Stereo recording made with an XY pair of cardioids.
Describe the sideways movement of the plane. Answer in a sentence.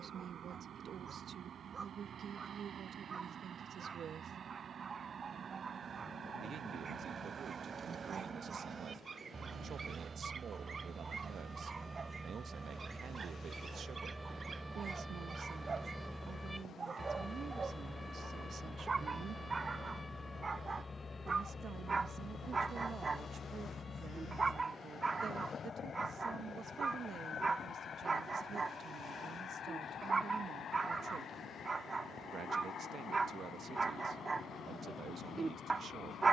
You can hear the plane move to the left.